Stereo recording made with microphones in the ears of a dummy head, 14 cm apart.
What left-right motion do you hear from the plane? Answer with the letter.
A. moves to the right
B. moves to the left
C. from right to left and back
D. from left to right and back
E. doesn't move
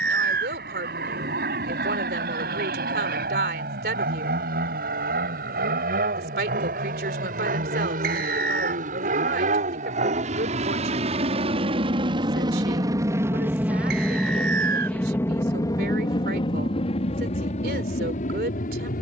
B.